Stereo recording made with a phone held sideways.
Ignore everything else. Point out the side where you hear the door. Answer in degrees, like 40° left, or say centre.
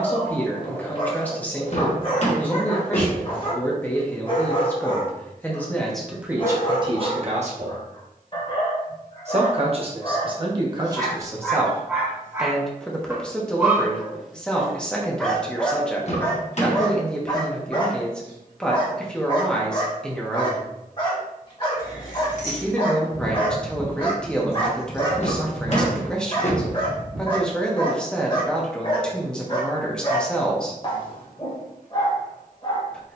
50° left.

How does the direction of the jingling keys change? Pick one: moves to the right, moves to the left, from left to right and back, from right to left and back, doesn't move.
moves to the right.